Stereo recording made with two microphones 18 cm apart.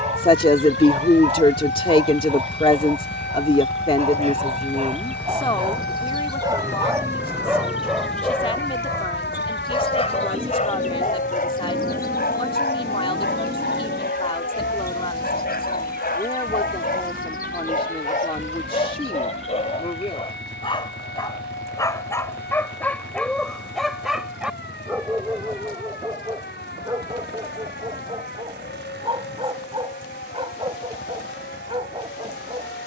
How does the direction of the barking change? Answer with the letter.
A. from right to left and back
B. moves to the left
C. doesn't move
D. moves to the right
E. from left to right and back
A.